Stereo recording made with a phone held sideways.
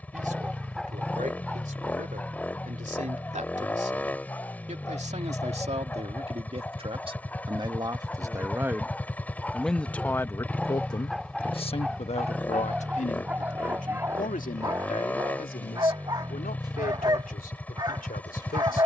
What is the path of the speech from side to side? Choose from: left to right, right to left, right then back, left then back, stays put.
right to left.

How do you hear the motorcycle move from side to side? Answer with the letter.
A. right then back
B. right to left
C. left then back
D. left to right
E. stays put
E.